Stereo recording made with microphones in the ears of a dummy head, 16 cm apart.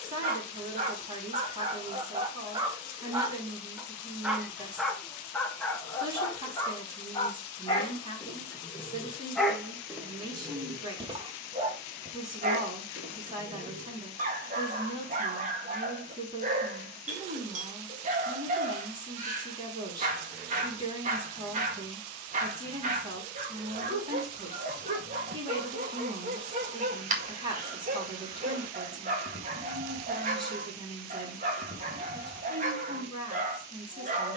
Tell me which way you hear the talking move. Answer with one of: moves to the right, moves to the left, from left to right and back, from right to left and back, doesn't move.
doesn't move.